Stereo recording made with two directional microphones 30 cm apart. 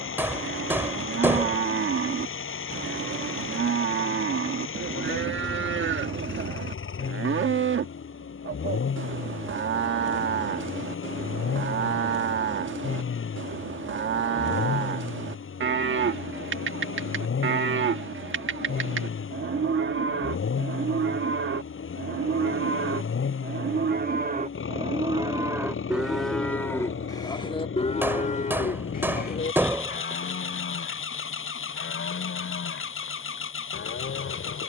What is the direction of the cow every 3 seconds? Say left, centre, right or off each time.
right, right, right, right, right, right, right, right, centre, left, left, left.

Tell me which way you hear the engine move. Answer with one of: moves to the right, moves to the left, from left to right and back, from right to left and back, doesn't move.
doesn't move.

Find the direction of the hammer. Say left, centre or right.
centre.